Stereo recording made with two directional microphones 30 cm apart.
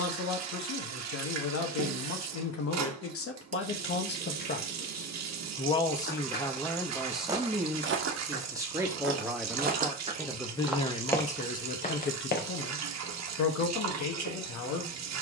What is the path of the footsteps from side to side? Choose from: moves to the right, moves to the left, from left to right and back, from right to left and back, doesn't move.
from left to right and back.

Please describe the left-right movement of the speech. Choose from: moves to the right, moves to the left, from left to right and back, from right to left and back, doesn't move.
from left to right and back.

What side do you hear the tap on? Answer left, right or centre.
right.